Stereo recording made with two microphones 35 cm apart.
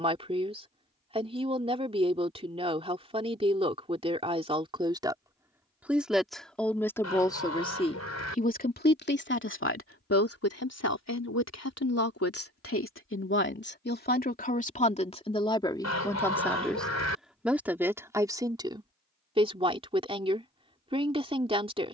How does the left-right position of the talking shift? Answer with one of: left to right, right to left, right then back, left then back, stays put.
left then back.